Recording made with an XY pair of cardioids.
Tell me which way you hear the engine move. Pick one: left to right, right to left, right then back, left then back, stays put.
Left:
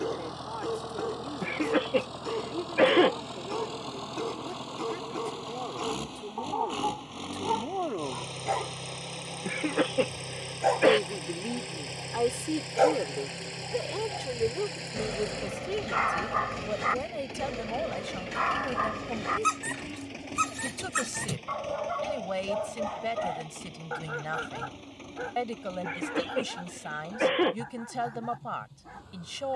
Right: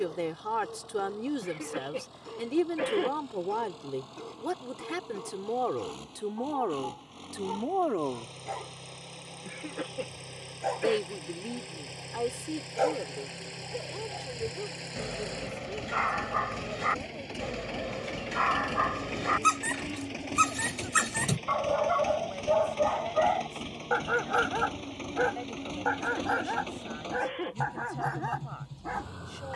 left to right.